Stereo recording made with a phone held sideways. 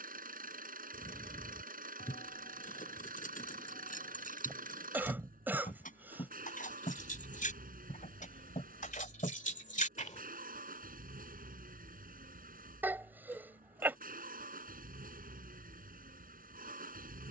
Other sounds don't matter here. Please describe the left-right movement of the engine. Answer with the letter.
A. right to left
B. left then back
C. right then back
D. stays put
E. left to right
D.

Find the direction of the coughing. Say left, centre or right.
centre.